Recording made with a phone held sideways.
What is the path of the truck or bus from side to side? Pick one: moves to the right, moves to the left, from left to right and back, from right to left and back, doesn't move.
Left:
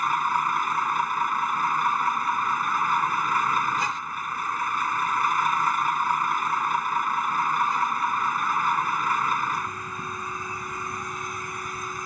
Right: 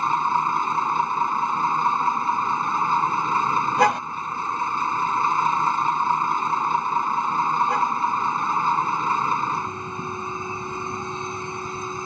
doesn't move.